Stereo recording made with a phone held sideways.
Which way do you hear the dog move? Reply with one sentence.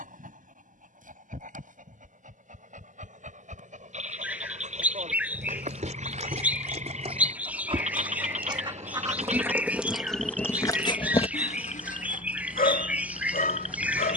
In this clip you hear the dog go from the right side to the left.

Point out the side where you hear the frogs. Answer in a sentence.
In this clip you hear the frogs on the right.